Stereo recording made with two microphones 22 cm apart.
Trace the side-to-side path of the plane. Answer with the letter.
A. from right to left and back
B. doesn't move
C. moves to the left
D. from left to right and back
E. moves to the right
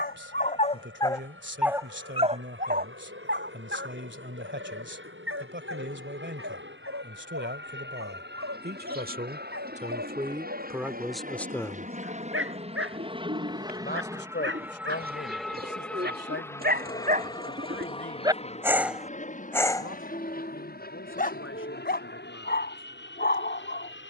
C.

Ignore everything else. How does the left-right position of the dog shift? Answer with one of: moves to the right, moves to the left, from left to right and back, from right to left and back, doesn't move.
from left to right and back.